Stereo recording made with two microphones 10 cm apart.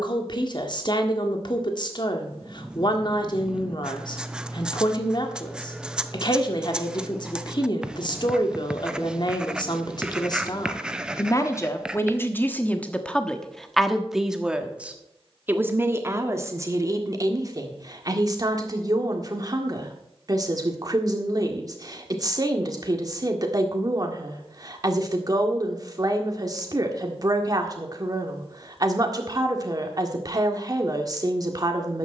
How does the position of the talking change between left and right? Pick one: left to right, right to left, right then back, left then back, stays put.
left to right.